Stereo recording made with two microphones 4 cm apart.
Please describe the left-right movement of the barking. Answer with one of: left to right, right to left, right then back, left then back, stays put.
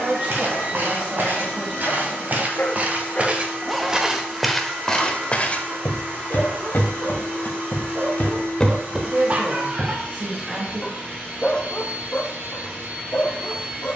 right then back.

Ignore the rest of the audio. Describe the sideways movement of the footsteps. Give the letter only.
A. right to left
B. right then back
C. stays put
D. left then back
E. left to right
D.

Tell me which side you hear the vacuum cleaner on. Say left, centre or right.
right.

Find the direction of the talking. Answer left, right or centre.
right.